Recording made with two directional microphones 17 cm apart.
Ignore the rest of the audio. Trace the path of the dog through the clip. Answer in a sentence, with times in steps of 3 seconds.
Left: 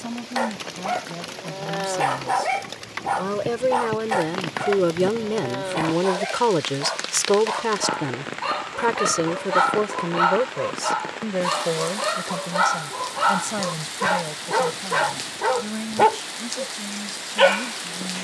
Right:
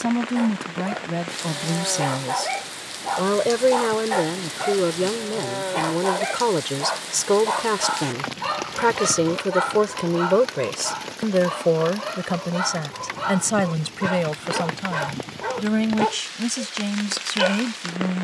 You can hear the dog on the left from 0 s, in the centre from 3 s and on the left from 9 s.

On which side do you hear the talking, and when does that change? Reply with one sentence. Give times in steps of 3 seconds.
You can hear the talking on the right from 0 s, in the centre from 3 s and on the right from 9 s.